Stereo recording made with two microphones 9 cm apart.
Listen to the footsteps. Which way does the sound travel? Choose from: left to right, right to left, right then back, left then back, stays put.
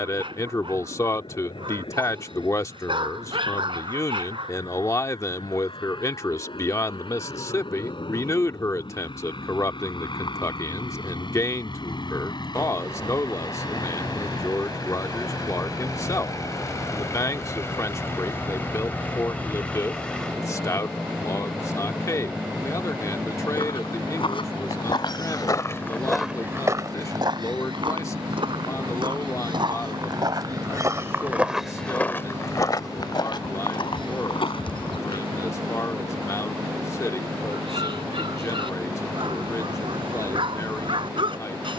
right then back.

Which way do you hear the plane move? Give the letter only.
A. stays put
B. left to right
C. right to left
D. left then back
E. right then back
B.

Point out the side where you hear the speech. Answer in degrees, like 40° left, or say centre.
30° left.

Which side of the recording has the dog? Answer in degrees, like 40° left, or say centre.
70° right.